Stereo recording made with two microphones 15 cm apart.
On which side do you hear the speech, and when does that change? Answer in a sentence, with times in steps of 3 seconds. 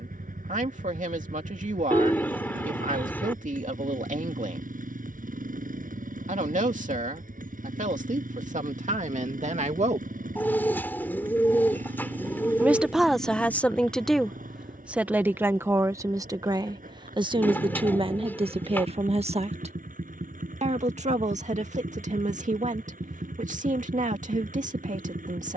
In this clip you hear the speech on the right from 0 s, in the centre from 12 s and on the right from 15 s.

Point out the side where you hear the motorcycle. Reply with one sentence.
In this clip you hear the motorcycle on the right.